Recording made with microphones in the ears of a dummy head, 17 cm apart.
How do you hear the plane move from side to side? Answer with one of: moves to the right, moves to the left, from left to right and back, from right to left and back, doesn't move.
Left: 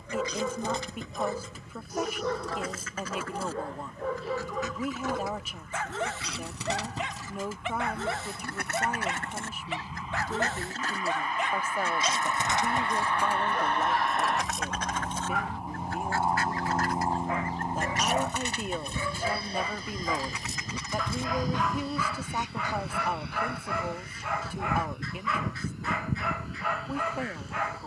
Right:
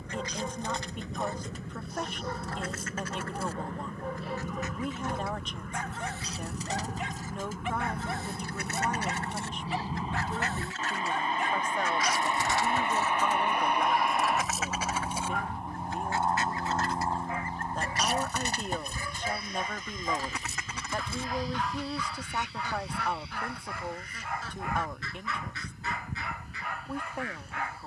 moves to the left.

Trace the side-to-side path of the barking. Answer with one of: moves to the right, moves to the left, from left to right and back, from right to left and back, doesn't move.
doesn't move.